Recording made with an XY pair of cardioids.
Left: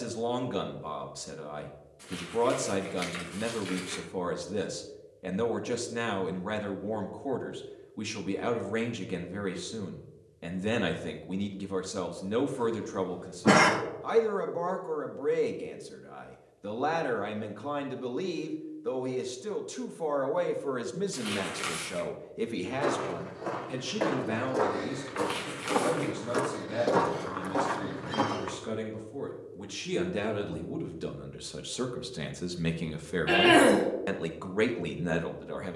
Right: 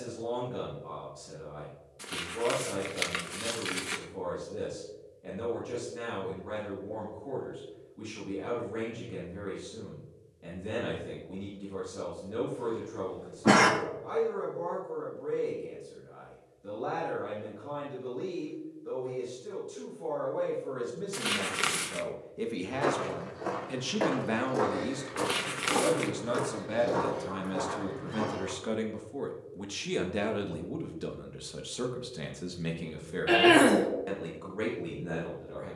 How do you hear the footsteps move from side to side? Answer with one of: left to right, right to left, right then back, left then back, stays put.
right to left.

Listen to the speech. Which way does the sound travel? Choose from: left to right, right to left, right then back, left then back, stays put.
right then back.